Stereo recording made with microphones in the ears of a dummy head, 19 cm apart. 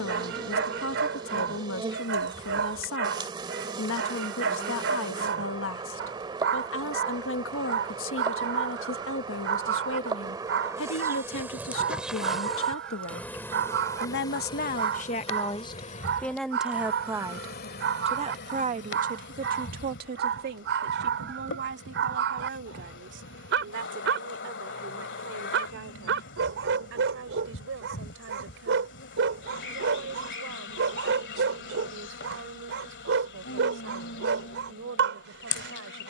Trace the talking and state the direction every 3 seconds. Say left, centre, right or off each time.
left, left, left, left, left, centre, right, right, right, right, right, right.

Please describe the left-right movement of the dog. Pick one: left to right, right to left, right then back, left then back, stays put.
stays put.